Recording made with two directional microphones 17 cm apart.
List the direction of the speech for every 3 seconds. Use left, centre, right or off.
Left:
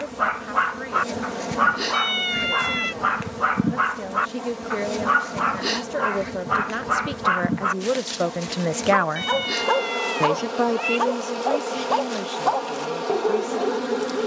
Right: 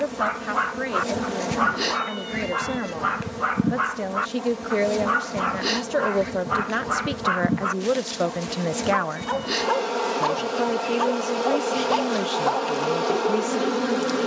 right, right, centre, centre, right.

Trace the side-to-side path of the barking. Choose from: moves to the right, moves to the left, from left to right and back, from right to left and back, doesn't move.
doesn't move.